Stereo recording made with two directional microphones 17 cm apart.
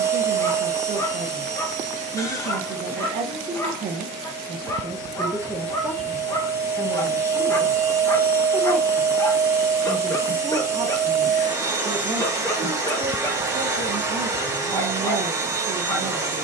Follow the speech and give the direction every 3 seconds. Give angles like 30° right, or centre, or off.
50° right, 30° right, 10° left, 10° right, 40° right, 40° right.